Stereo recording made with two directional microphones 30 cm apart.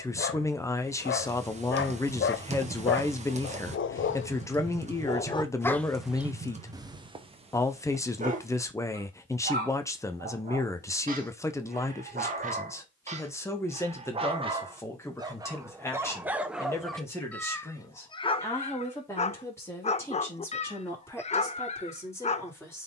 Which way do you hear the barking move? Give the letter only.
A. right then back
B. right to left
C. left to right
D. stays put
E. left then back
A.